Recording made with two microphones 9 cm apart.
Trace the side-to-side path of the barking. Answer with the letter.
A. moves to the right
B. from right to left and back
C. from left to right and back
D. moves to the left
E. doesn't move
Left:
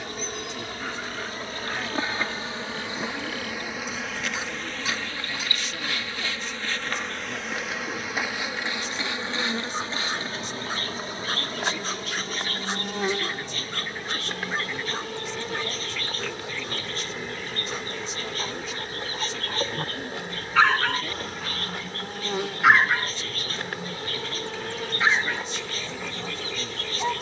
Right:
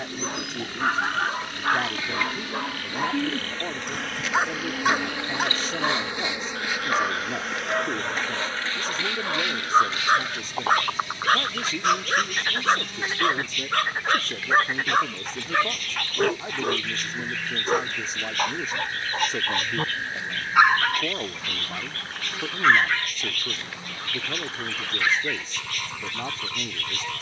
D.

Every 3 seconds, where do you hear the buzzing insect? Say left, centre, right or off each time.
left, centre, centre, left, left, left, left, left, left.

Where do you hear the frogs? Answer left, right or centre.
right.